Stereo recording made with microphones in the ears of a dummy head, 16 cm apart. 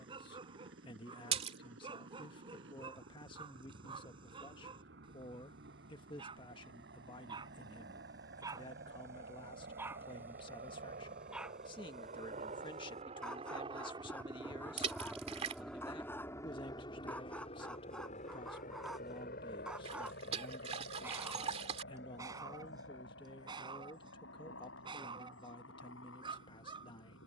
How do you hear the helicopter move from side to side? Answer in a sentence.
In this clip you hear the helicopter move to the left.